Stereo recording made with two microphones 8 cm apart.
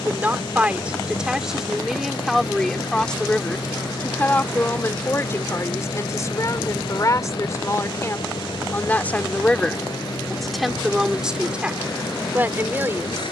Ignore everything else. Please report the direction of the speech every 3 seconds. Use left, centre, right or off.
centre, left, left, centre, right.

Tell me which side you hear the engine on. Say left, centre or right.
left.